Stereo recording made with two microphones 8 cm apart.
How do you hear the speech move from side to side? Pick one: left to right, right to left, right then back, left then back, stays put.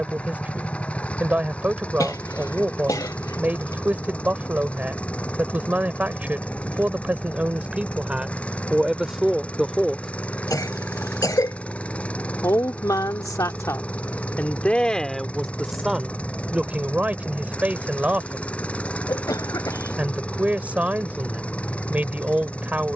left then back.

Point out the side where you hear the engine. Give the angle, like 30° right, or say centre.
10° left.